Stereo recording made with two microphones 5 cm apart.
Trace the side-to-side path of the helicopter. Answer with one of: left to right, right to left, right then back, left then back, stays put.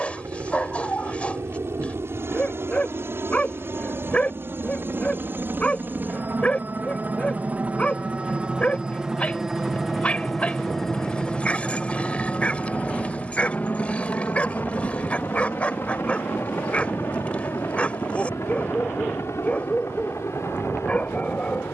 right to left.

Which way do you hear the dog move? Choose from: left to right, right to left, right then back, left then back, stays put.
stays put.